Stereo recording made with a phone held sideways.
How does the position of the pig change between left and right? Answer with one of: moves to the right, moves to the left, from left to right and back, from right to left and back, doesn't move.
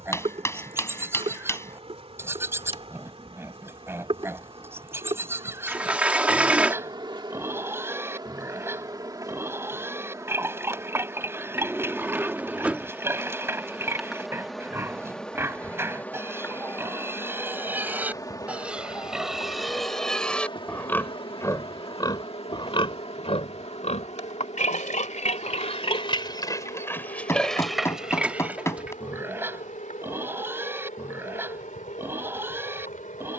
from right to left and back.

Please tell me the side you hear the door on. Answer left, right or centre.
centre.